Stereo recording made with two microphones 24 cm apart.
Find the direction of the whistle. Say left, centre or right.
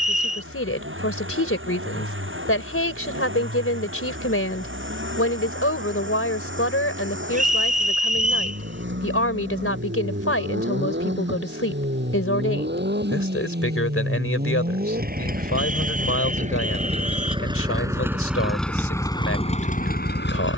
right.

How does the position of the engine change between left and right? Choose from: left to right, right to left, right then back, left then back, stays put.
right to left.